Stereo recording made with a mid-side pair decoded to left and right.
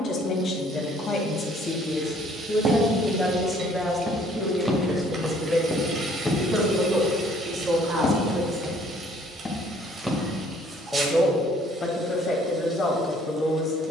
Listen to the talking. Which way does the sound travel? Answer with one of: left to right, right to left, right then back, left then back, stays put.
right then back.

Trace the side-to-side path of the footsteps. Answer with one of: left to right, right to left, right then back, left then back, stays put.
left then back.